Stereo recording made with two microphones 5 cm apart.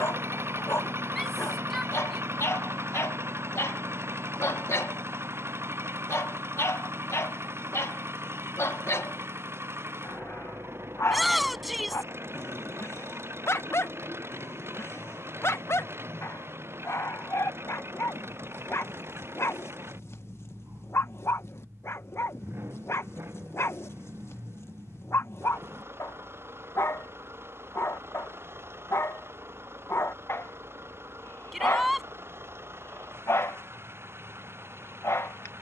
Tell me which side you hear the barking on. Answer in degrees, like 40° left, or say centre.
60° left.